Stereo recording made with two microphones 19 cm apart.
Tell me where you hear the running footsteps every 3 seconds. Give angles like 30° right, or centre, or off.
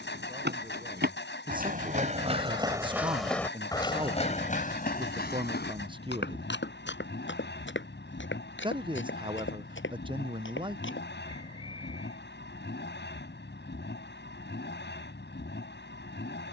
40° right, 30° left, 70° left, 80° left, off, off.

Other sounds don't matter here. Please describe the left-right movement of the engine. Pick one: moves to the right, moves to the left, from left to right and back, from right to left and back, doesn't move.
doesn't move.